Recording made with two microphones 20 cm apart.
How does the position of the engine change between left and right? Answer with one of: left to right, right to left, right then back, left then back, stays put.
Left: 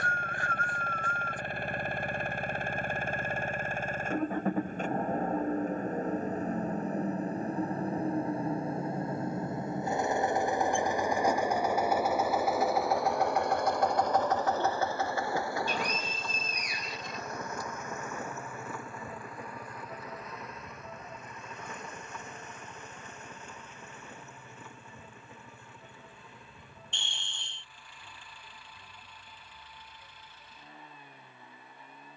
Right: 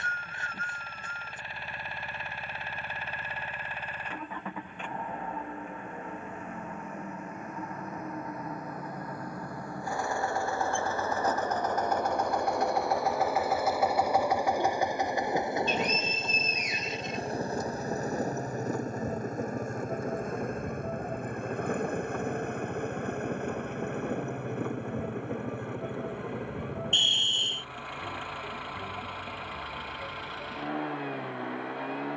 left to right.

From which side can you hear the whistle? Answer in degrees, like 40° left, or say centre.
20° right.